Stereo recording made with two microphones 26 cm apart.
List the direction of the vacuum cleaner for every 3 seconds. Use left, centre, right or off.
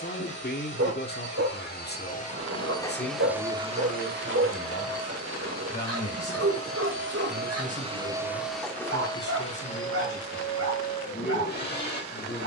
left, right, right, left.